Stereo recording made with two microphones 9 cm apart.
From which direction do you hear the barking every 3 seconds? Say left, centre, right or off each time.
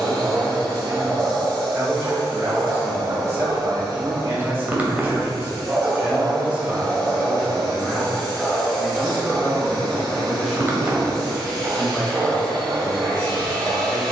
right, right, centre, right, right.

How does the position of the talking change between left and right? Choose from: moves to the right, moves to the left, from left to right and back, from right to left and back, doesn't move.
moves to the left.